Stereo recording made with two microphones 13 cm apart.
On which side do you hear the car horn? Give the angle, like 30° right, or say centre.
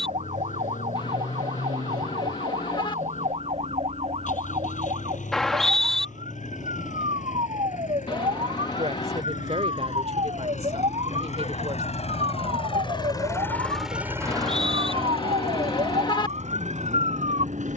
40° left.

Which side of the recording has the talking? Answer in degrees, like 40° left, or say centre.
60° right.